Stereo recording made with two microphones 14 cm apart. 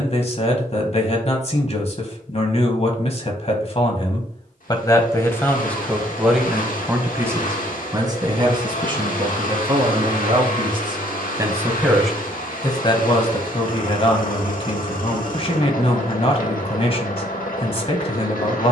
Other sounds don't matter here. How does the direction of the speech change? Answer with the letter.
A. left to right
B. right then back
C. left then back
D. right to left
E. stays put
B.